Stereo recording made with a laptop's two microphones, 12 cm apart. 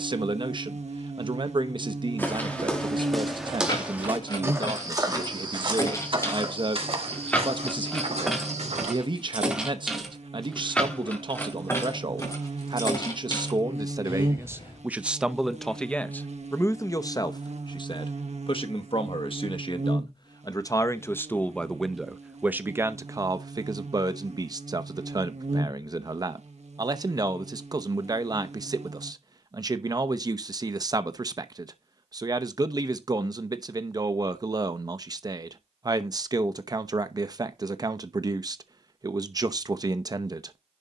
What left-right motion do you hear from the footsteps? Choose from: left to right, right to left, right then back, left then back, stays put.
left to right.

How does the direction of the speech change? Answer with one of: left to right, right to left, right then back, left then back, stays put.
left then back.